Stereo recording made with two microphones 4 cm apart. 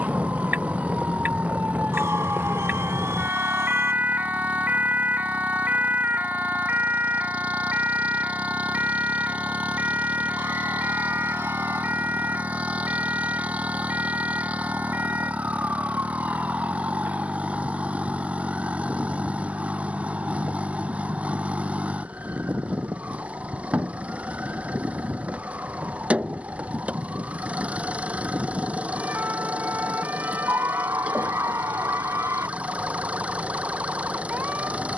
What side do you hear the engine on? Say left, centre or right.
right.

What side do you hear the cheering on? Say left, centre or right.
right.